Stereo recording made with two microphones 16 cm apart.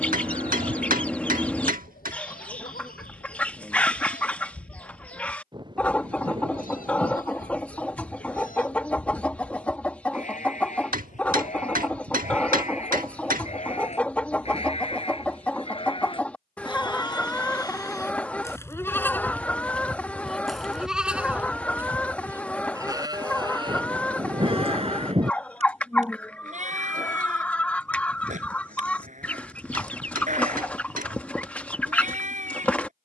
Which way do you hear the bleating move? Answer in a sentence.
You can hear the bleating travel towards the right.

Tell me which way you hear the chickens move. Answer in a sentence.
You can hear the chickens stay in one place.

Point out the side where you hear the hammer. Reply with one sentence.
In this clip you hear the hammer on the right.